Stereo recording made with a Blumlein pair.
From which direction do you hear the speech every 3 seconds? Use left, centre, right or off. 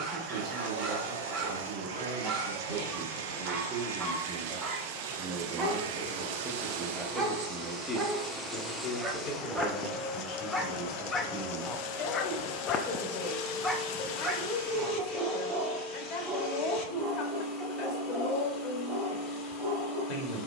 right, right, centre, left, left, left, left.